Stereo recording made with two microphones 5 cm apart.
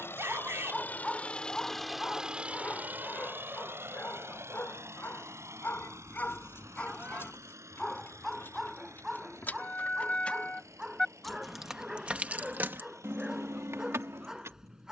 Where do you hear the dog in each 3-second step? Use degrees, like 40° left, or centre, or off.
10° left, 40° left, 10° left, 10° right, 10° right.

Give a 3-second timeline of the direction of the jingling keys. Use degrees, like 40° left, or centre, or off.
off, off, 50° left, 20° left, 50° right.